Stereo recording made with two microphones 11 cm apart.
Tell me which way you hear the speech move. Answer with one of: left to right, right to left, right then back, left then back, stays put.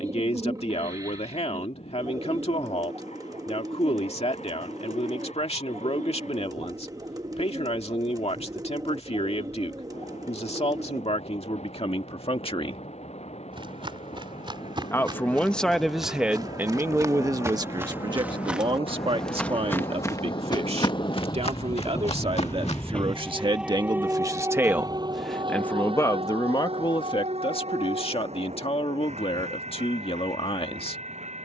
right then back.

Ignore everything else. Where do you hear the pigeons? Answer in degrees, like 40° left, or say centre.
30° right.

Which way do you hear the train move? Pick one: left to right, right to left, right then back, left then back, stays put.
left to right.